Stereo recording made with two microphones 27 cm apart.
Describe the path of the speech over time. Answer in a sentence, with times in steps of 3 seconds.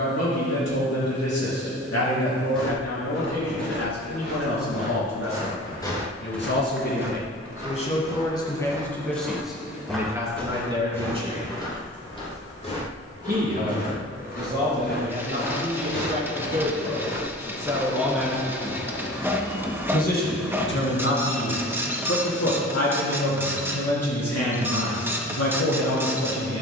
In this clip you hear the speech on the left from 0 s, in the centre from 9 s, on the right from 12 s and on the left from 18 s.